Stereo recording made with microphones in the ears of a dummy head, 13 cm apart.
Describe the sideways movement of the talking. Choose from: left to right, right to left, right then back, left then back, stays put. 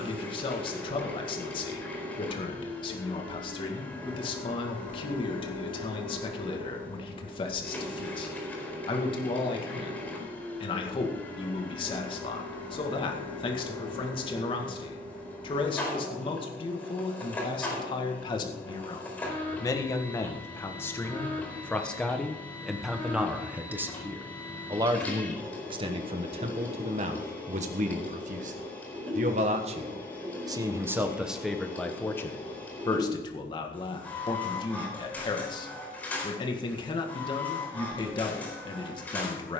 right then back.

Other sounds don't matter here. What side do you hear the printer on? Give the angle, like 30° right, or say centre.
10° left.